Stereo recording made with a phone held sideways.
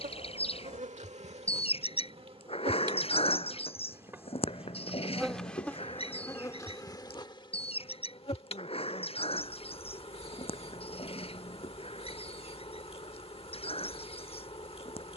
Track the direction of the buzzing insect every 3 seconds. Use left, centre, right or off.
right, centre, left, left, left.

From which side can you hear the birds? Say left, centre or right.
left.